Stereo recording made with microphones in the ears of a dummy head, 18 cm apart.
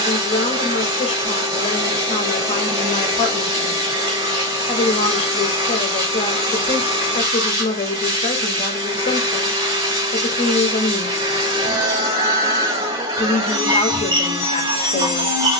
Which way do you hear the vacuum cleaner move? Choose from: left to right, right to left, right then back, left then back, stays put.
stays put.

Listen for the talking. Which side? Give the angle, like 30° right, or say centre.
30° left.